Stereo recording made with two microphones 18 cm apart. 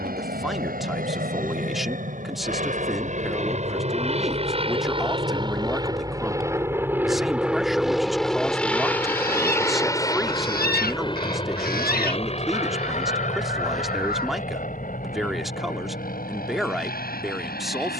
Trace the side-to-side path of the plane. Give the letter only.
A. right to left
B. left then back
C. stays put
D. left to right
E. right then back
A.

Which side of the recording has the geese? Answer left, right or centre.
left.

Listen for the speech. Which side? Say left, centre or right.
centre.